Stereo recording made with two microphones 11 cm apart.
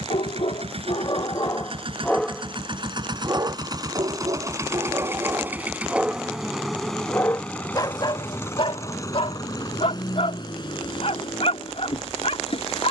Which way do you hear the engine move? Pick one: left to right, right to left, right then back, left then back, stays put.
right to left.